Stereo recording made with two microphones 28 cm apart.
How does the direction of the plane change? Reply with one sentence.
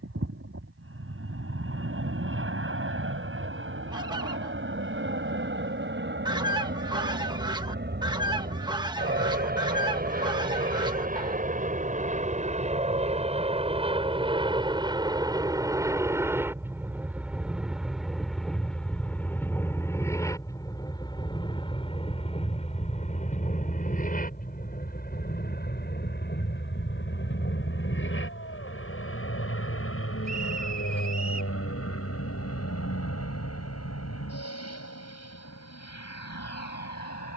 You can hear the plane travel towards the left.